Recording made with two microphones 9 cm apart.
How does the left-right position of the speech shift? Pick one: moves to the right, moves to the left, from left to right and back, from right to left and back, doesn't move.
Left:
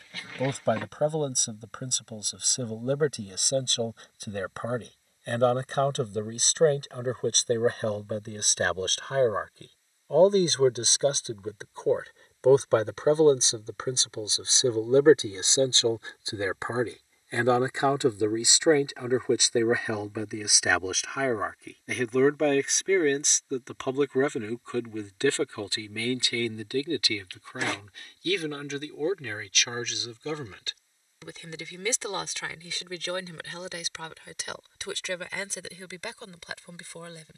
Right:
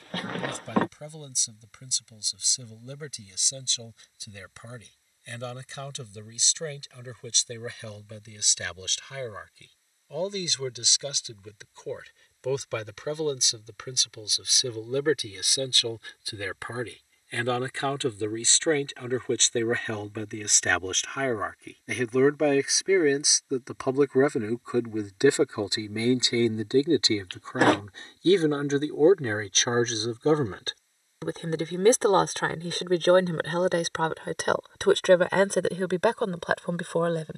moves to the right.